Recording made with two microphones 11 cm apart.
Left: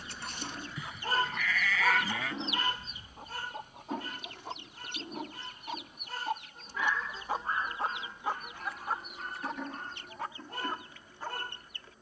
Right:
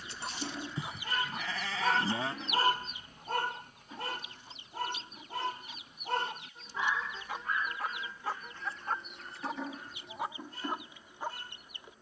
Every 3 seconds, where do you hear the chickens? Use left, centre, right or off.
centre, left, left, centre.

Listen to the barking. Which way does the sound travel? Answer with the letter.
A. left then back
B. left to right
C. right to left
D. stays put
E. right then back
E.